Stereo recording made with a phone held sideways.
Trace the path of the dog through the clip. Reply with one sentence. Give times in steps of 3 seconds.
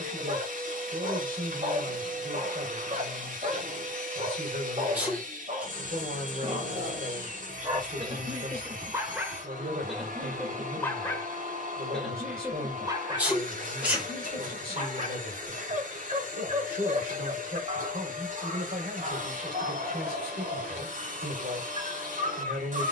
You can hear the dog on the right from 0 s, in the centre from 9 s and on the right from 12 s.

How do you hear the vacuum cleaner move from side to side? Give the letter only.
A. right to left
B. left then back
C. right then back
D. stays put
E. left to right
D.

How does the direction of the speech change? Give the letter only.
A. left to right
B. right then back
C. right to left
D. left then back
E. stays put
E.